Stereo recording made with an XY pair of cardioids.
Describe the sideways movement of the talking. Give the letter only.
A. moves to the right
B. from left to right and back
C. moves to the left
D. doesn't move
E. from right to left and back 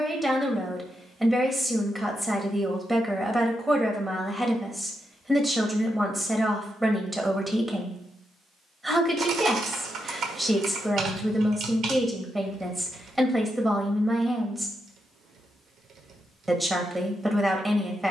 D.